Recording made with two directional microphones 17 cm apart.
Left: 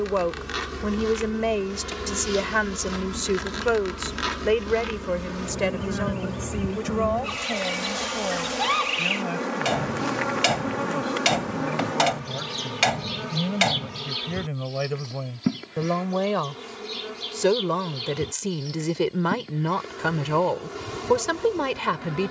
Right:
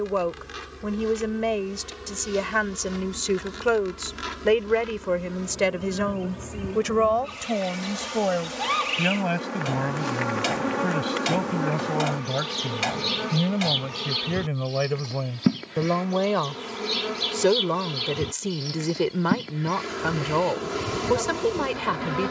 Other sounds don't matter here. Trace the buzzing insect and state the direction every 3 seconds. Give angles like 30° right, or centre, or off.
60° left, 40° left, 30° left, centre, 20° right, 40° right, 40° right, 40° right.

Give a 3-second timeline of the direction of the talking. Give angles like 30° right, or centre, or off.
20° left, 10° right, 40° right, 50° right, 40° right, 20° right, centre, 10° left.